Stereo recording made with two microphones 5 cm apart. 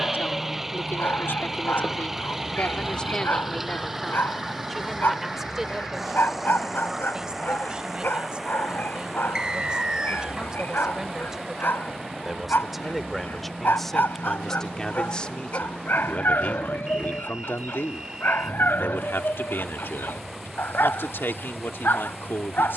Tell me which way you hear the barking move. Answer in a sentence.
You can hear the barking stay put.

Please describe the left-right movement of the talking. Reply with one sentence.
You can hear the talking move from left to right and back again.